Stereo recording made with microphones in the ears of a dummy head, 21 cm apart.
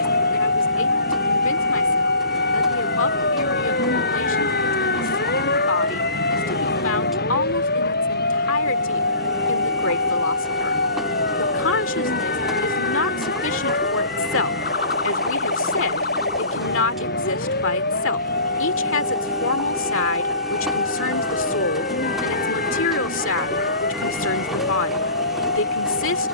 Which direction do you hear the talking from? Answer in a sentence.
You can hear the talking on the left.